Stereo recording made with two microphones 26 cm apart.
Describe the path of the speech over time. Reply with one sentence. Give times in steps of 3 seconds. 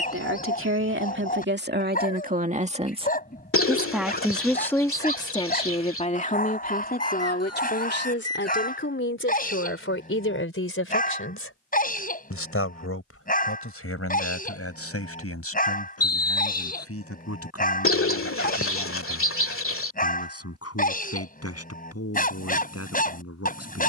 You can hear the speech on the right from 0 s, in the centre from 3 s and on the left from 6 s.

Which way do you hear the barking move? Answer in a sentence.
You can hear the barking stay put.